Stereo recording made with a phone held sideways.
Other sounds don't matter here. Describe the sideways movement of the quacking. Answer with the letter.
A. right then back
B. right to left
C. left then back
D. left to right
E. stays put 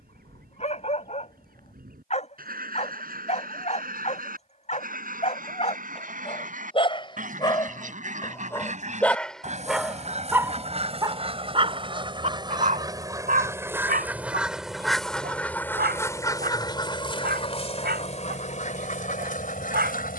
B.